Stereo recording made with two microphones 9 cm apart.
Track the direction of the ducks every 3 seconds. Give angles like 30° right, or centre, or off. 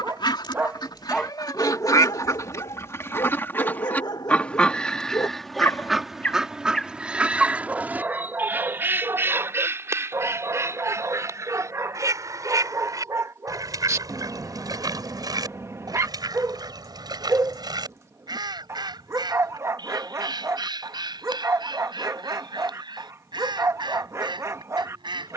40° left, 10° left, 10° right, 30° right, 40° right, 50° right, 50° right, 50° right, 50° right.